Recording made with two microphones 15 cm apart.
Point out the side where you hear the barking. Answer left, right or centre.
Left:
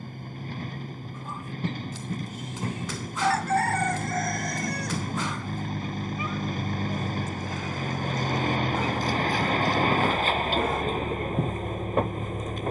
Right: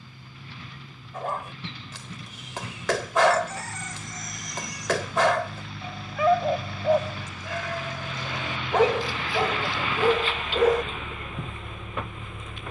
right.